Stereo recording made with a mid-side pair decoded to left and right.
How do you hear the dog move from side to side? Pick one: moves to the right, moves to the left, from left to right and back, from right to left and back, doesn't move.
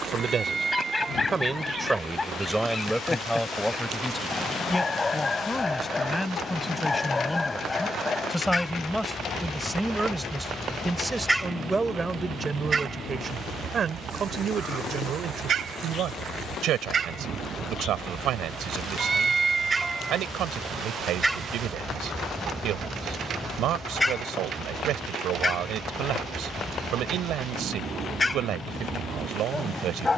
from left to right and back.